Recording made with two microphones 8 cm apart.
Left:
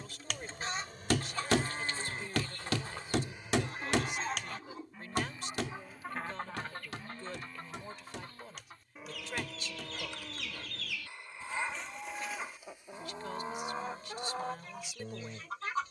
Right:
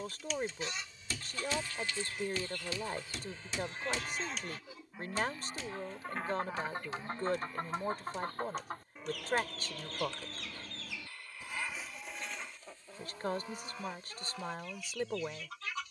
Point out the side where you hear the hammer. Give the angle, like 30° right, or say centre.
70° left.